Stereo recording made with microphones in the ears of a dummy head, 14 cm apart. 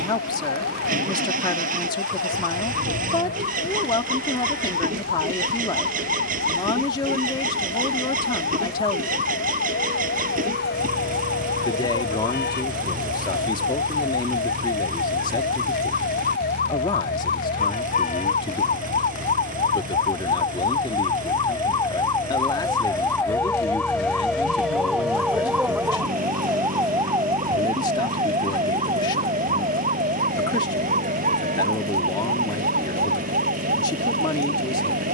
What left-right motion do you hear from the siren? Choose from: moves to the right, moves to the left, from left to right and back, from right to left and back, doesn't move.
moves to the right.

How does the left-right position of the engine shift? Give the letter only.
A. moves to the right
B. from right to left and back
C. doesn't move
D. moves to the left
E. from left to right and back
C.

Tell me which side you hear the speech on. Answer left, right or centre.
left.